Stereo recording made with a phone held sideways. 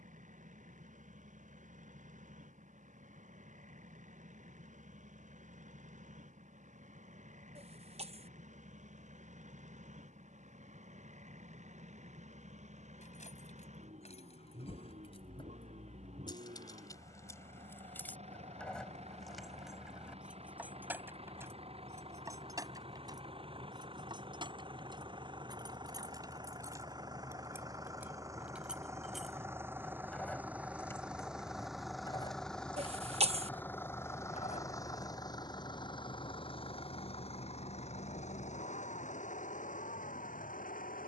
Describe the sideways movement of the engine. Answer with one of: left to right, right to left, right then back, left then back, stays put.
right to left.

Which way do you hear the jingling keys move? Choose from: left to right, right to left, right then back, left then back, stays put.
right then back.